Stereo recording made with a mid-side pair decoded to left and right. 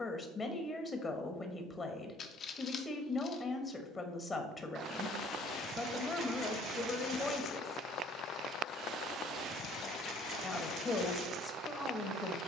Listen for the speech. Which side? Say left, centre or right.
left.